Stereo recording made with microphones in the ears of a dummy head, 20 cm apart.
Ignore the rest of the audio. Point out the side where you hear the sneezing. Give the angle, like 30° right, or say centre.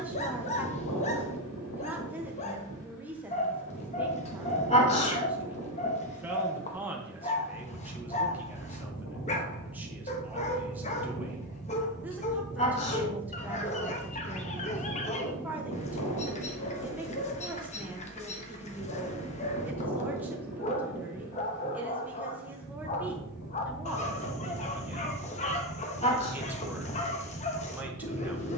30° left.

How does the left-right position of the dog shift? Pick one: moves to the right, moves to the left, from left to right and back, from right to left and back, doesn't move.
doesn't move.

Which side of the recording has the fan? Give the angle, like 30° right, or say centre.
80° left.